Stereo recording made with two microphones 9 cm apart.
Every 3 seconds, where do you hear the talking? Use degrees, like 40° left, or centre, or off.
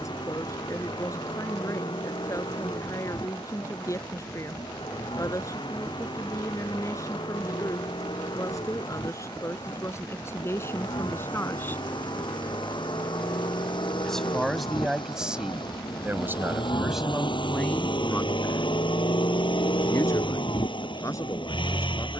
40° left, 40° left, 40° left, 30° left, centre, 10° right, 30° left, 40° left.